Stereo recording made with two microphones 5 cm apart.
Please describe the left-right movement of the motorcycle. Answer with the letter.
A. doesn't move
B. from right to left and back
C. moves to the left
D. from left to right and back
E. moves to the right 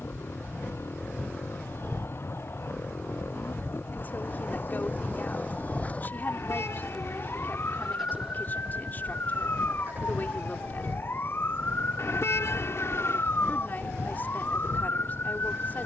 E.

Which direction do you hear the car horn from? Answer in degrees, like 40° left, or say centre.
70° left.